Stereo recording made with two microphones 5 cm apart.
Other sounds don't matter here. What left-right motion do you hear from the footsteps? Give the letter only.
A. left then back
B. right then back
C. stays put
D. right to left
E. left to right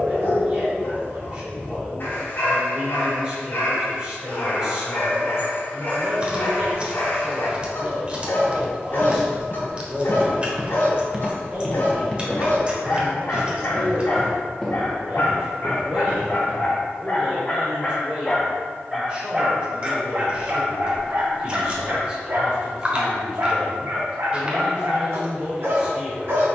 A.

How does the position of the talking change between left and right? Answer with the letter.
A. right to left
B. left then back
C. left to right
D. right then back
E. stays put
E.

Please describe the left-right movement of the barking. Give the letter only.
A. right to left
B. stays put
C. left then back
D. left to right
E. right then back
D.